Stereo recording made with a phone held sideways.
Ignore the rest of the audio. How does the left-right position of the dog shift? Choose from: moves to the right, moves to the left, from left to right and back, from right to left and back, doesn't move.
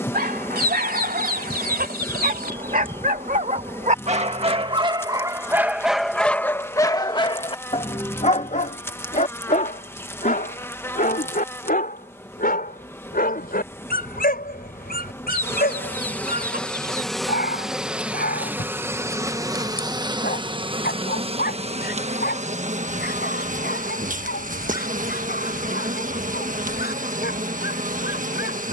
moves to the left.